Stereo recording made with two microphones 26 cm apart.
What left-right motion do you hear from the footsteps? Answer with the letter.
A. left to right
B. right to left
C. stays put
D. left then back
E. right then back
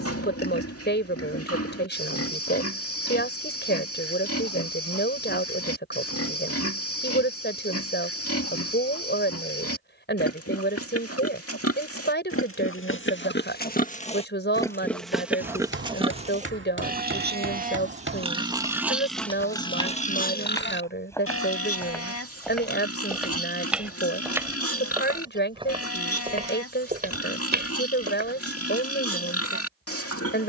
A.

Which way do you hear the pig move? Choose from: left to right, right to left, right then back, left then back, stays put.
right then back.